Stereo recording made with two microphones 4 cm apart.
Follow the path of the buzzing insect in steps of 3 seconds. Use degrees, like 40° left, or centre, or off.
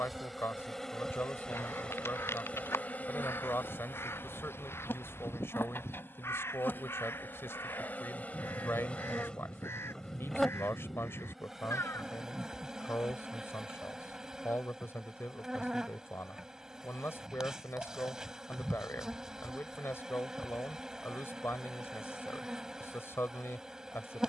20° left, 60° left, 50° left, 10° left, 20° right, 20° right, 20° right, 20° right.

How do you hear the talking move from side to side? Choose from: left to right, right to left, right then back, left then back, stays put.
stays put.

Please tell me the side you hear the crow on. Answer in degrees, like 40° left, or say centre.
80° left.